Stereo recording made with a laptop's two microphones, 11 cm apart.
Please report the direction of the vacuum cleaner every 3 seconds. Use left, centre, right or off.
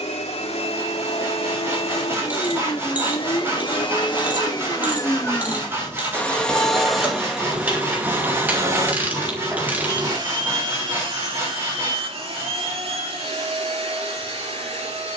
left, left, centre, right, right.